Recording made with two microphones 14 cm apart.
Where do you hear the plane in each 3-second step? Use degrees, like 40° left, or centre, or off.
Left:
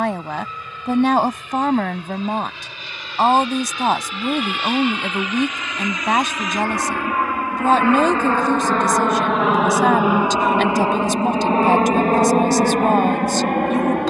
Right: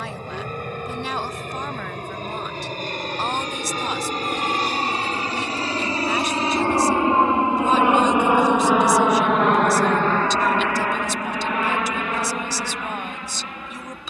50° right, 40° right, 20° right, 20° left, 50° left.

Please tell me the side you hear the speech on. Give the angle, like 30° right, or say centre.
60° left.